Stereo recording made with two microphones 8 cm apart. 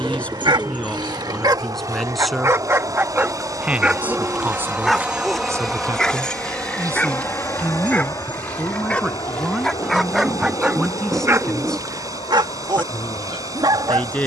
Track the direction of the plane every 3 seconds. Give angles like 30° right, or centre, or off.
50° right, 20° right, 30° left, 60° left, 70° left.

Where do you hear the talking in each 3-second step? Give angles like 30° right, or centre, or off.
10° left, 20° right, 20° right, centre, 20° left.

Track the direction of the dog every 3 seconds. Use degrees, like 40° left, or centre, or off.
50° right, 10° right, 20° left, 10° right, 60° right.